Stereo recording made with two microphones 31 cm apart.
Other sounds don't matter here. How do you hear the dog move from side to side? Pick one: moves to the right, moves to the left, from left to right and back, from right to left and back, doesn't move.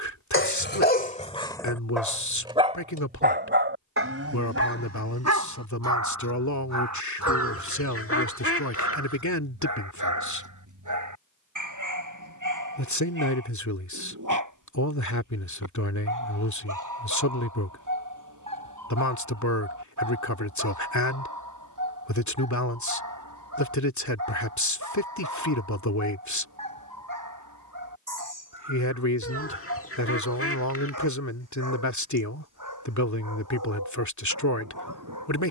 moves to the right.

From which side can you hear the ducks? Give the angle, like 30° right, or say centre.
50° left.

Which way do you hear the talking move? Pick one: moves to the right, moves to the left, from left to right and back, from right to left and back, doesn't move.
doesn't move.